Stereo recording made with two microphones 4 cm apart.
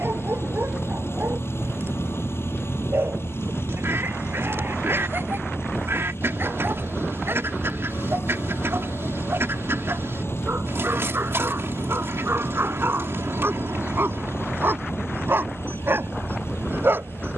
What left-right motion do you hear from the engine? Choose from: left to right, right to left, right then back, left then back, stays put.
stays put.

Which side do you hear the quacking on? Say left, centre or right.
right.